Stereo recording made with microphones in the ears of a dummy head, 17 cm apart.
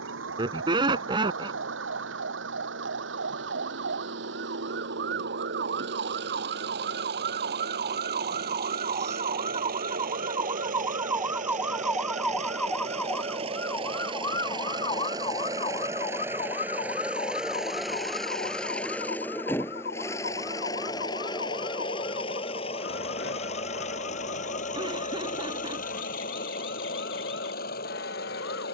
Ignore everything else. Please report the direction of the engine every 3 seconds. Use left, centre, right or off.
right, right, right, right, right, centre, centre, left, left, left.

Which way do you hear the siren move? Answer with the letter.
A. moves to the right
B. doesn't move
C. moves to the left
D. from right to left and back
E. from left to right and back
C.